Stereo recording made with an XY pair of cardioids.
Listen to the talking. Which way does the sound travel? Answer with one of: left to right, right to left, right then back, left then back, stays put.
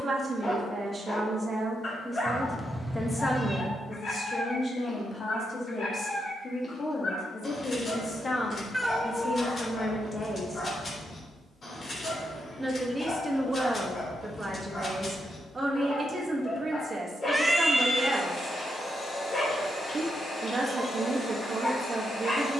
left then back.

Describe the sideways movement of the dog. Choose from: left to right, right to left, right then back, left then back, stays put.
stays put.